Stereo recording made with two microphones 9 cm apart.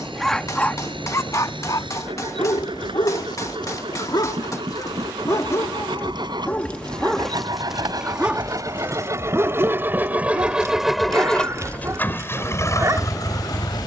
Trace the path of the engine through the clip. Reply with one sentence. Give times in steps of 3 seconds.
You can hear the engine on the right from 0 s, in the centre from 9 s and on the left from 12 s.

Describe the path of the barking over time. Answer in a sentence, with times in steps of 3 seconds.
You can hear the barking on the left from 0 s, in the centre from 6 s and on the right from 9 s.